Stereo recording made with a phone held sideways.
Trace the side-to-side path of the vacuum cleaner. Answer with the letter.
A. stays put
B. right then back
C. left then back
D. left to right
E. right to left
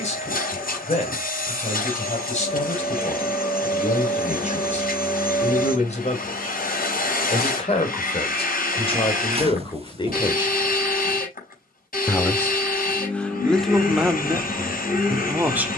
A.